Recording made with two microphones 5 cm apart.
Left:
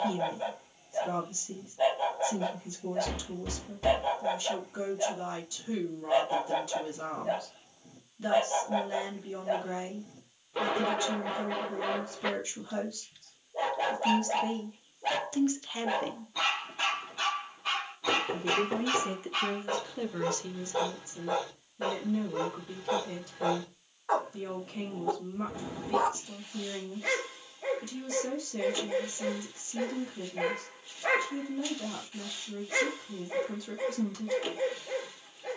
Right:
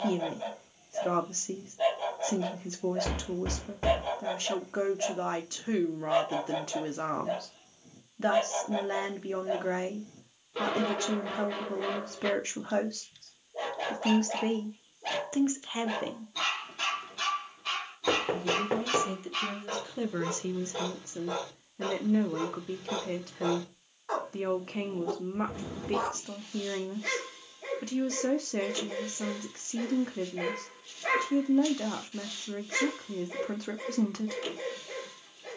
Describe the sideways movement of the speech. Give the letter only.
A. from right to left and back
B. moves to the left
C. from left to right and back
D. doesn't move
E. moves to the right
A.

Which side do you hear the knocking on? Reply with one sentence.
You can hear the knocking on the right.